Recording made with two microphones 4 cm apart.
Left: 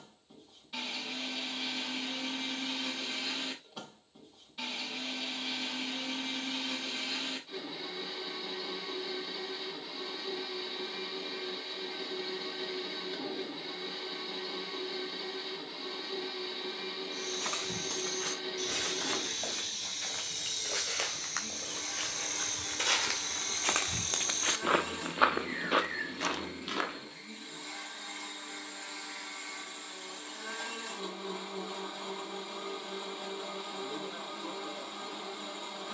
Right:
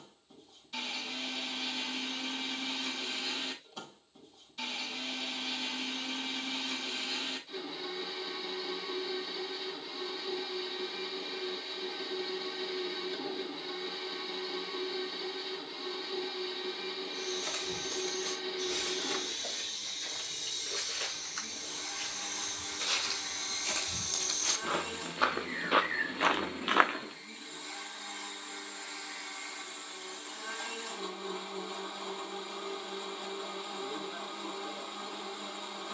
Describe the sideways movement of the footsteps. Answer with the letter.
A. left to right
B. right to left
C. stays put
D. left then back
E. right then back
A.